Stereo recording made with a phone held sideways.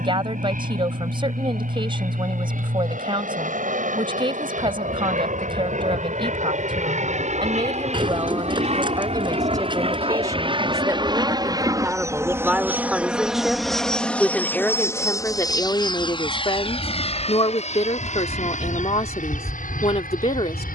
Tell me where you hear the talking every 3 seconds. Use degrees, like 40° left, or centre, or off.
30° right, 30° right, 30° right, 20° right, centre, 30° left, 40° left.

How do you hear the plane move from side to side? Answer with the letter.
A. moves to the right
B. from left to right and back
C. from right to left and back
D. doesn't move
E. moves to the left
E.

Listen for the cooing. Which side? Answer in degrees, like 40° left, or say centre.
30° right.